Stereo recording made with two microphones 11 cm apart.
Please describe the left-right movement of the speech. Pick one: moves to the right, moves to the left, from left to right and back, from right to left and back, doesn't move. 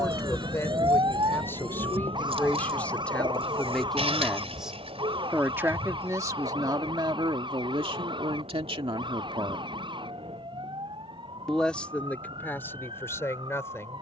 from left to right and back.